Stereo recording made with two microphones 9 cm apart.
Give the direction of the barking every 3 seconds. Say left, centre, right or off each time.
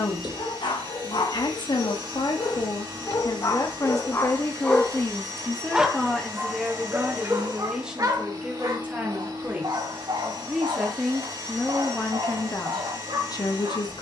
left, left, right, right, right.